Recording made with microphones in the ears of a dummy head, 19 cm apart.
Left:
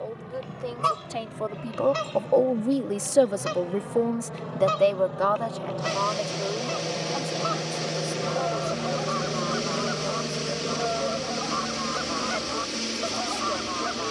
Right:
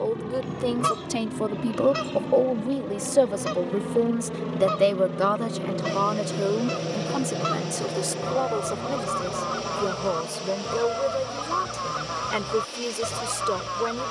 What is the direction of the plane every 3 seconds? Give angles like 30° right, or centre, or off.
70° right, 50° right, 10° right, 30° left, 50° left.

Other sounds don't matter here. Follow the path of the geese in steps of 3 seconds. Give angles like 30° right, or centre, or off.
20° right, 10° left, 30° right, 40° right, 40° right.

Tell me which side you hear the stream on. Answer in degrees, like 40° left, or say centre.
30° left.